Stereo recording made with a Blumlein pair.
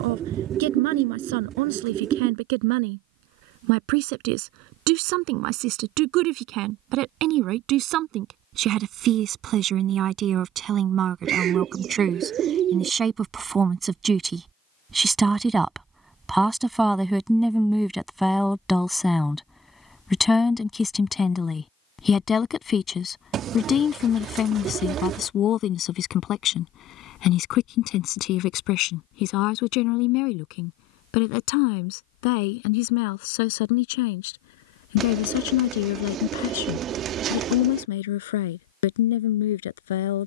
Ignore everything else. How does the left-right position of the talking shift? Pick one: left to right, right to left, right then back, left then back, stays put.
right to left.